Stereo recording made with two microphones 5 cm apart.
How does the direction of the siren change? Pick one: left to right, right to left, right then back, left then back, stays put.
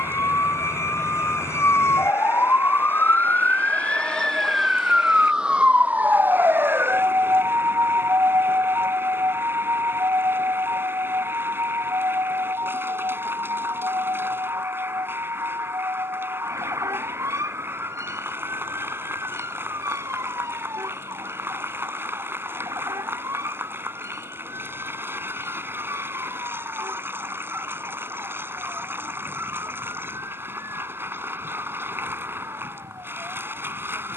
left to right.